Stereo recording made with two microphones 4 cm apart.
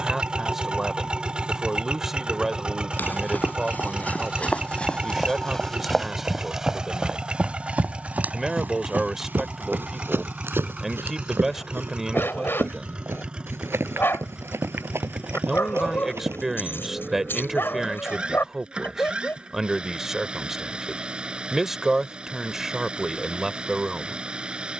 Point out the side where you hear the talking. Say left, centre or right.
centre.